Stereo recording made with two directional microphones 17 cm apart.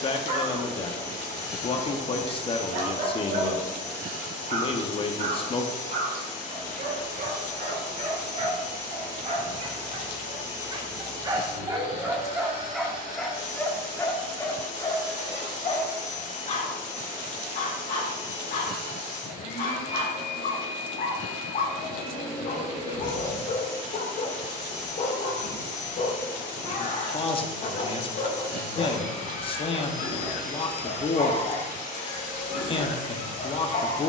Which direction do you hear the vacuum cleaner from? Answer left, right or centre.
left.